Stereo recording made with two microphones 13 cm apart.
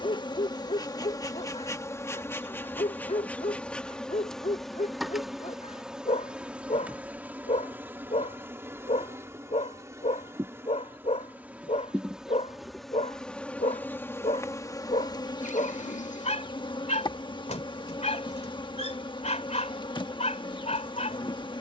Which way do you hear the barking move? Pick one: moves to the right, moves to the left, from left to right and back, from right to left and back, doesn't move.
doesn't move.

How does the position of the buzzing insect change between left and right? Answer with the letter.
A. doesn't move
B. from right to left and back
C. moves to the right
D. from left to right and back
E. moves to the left
D.